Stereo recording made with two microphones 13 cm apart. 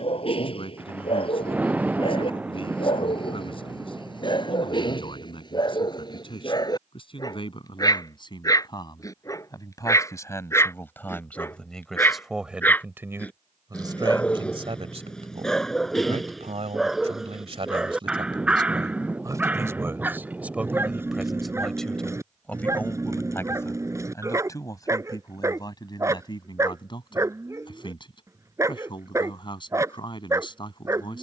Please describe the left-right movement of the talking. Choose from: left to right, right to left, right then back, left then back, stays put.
right then back.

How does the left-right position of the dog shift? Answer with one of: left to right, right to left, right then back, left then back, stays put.
left to right.